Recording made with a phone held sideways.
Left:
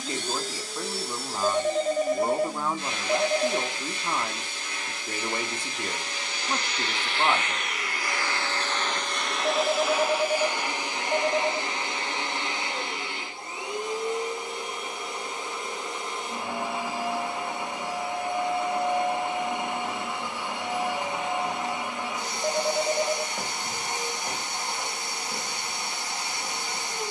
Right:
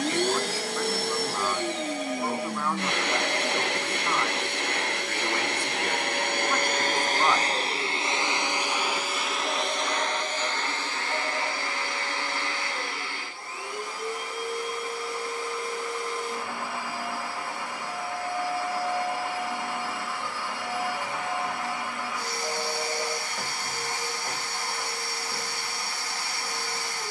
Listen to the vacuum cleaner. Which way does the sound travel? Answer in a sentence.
In this clip you hear the vacuum cleaner move to the left.